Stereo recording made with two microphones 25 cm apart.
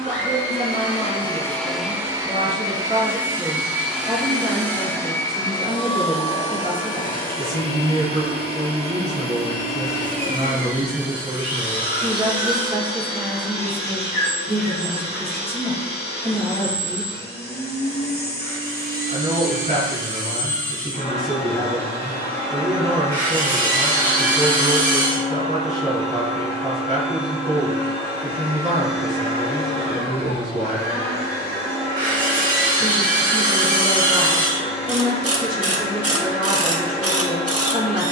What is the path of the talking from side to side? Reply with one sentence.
You can hear the talking stay put.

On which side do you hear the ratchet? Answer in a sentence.
In this clip you hear the ratchet on the right.